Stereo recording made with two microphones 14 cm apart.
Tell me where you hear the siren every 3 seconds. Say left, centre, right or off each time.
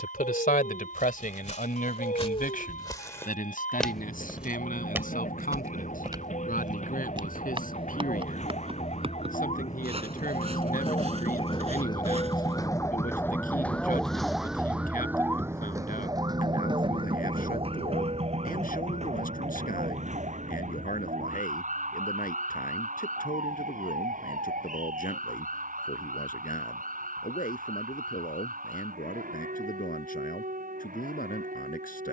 left, left, left, left, centre, right, right, right, right, right, right.